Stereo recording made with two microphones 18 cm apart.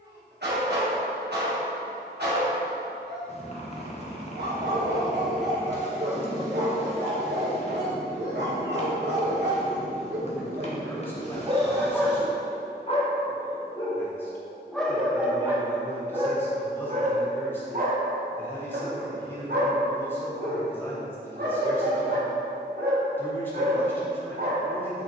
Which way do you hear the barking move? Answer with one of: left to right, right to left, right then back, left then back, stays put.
left then back.